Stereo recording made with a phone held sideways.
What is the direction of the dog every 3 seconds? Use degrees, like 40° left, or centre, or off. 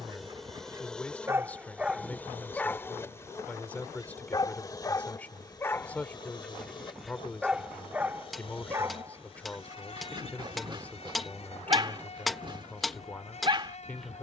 10° right, 20° left, 10° right, 30° right, 30° right.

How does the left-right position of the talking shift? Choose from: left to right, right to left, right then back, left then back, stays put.
stays put.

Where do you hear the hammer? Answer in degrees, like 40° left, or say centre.
centre.